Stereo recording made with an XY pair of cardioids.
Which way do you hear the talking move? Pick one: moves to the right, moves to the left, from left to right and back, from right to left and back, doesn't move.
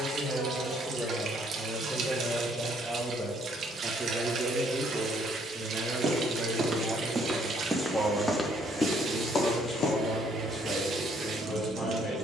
from left to right and back.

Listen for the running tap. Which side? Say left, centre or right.
right.